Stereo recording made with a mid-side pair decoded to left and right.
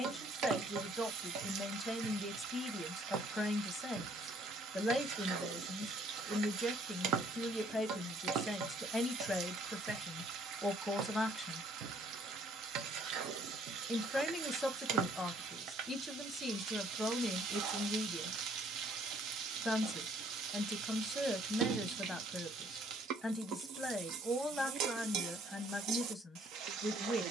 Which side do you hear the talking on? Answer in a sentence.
In this clip you hear the talking in the centre.